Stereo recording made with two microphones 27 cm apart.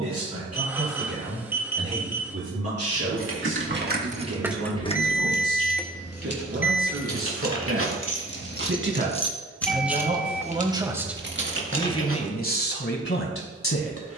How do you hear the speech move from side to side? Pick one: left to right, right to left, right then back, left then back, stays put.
right to left.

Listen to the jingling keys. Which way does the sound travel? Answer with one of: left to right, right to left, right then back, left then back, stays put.
left then back.